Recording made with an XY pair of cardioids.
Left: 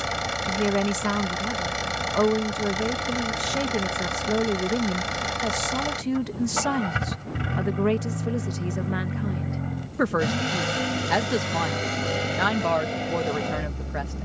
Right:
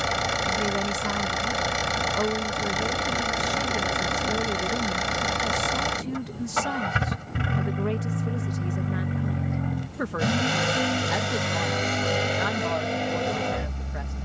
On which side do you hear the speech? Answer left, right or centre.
left.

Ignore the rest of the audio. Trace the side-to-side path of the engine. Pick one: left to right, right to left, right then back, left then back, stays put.
stays put.